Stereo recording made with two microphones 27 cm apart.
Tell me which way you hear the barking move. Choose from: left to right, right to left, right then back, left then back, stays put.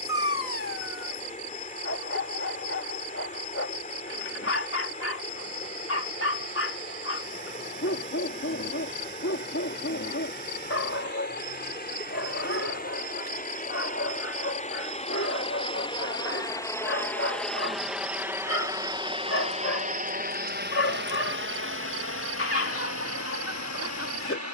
stays put.